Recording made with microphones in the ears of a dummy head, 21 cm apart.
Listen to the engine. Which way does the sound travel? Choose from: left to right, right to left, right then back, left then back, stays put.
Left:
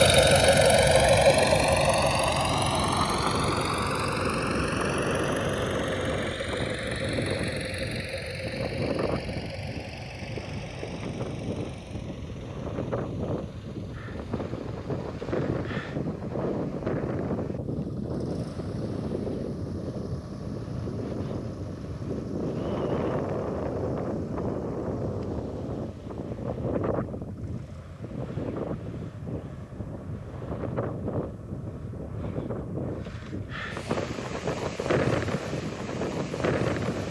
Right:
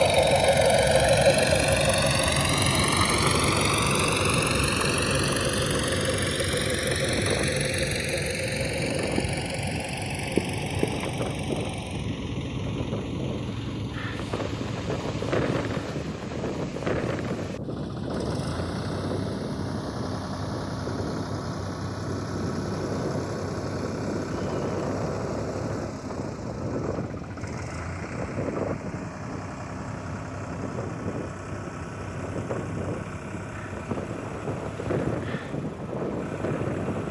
left to right.